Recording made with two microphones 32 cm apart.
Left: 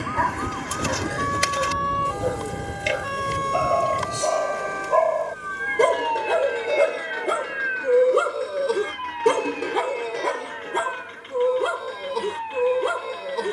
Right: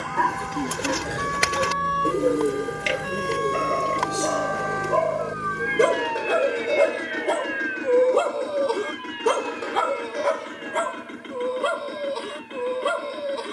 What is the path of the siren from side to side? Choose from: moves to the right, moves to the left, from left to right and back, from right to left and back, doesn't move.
moves to the left.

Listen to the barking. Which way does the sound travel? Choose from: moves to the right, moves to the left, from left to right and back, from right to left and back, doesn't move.
moves to the left.